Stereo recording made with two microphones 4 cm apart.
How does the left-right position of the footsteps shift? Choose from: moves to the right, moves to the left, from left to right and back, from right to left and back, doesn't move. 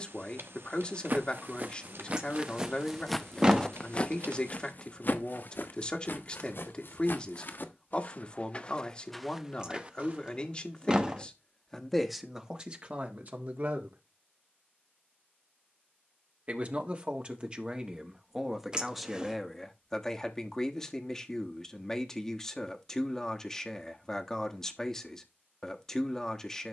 from right to left and back.